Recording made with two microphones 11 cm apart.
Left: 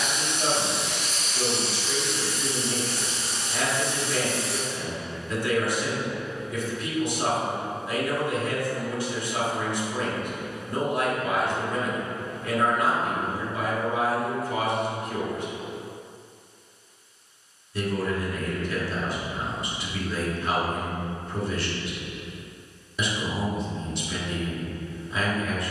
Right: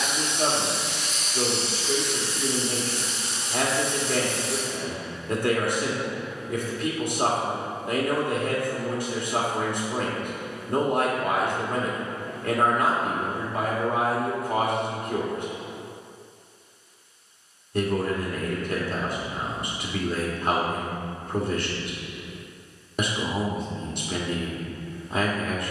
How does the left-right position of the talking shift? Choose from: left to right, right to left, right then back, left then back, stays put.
stays put.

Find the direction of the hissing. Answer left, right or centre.
left.